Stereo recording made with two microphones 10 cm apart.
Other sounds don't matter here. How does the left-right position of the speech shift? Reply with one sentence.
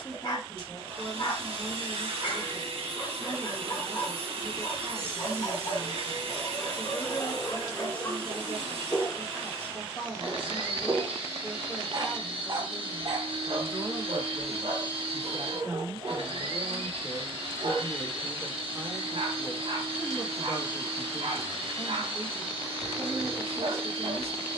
You can hear the speech go right and come back.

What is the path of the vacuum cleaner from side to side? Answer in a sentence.
You can hear the vacuum cleaner stay in one place.